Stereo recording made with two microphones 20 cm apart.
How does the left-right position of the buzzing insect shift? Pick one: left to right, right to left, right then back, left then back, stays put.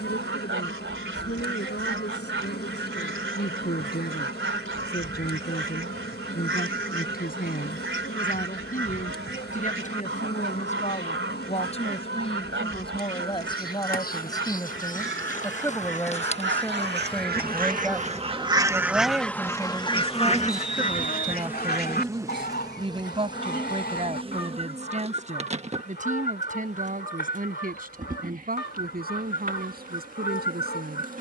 left to right.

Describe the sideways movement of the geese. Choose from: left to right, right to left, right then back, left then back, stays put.
right to left.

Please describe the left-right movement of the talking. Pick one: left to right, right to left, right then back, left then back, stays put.
left to right.